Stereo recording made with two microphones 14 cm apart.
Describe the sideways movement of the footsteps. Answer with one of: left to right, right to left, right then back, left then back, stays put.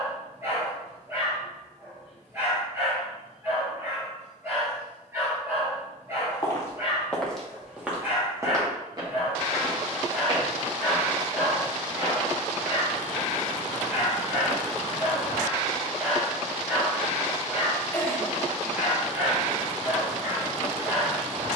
right then back.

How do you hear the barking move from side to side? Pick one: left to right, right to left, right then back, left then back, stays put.
stays put.